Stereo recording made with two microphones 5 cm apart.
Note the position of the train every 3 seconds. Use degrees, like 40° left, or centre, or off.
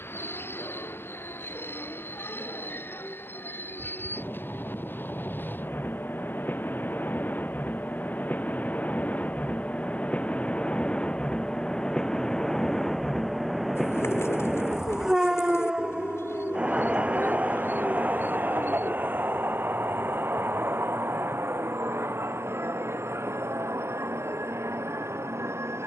60° left, 50° left, 40° left, 30° left, centre, 20° right, 50° right, 60° right, 70° right.